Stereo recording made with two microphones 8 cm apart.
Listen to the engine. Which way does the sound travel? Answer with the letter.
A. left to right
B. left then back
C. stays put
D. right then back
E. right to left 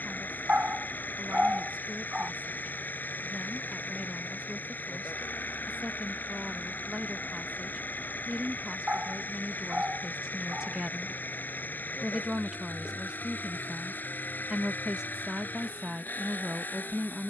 C.